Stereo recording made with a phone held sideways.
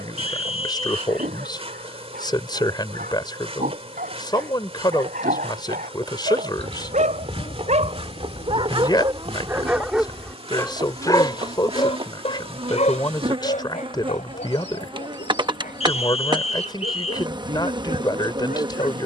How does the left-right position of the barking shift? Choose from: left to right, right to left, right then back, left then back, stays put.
right to left.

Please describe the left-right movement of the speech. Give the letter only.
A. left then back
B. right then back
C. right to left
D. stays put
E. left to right
D.